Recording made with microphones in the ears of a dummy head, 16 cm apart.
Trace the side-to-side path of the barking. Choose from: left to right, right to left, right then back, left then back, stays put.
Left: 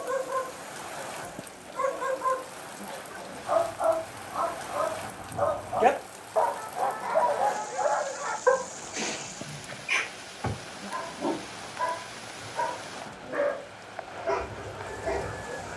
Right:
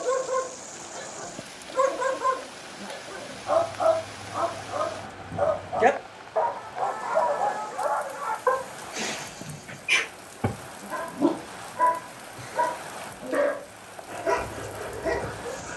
left then back.